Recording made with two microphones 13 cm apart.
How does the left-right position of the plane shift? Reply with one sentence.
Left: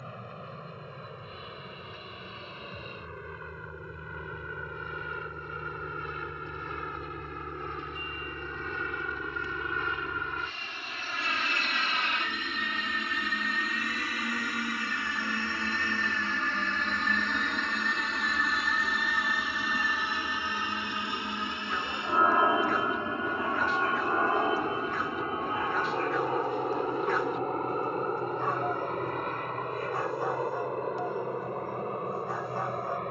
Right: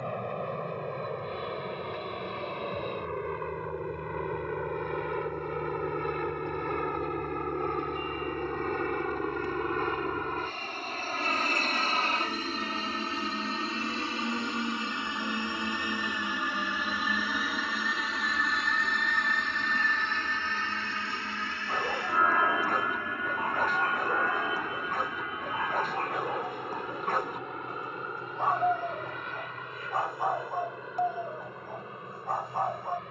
In this clip you hear the plane go from the right side to the left.